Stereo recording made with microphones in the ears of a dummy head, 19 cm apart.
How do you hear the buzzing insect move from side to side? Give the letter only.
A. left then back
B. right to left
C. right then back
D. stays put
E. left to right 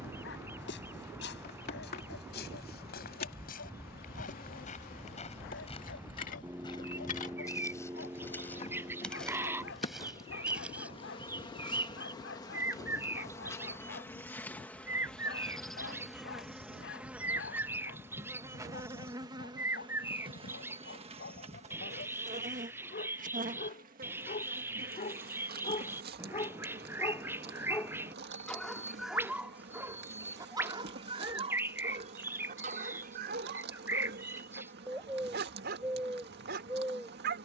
E.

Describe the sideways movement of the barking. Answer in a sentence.
In this clip you hear the barking travel towards the right.